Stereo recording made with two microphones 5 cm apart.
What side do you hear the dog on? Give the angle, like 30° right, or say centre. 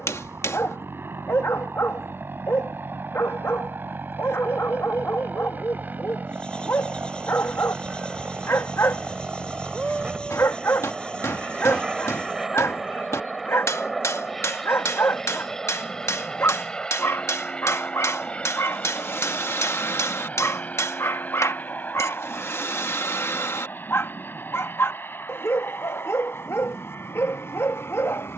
60° left.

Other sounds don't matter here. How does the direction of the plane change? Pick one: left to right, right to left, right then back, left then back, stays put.
right to left.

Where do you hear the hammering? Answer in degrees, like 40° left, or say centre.
80° left.